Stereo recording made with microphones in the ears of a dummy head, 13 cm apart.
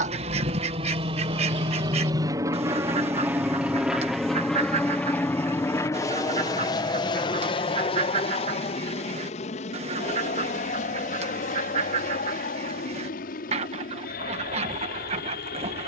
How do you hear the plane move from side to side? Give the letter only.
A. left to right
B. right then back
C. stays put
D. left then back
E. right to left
E.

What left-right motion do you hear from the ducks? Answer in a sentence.
In this clip you hear the ducks stay in one place.